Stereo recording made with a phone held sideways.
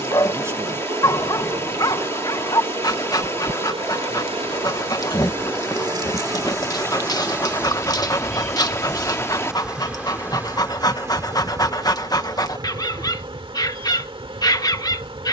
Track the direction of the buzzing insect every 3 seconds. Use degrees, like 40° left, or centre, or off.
40° right, 40° right, 10° right, 10° right, 40° right.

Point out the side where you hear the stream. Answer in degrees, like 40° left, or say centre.
20° left.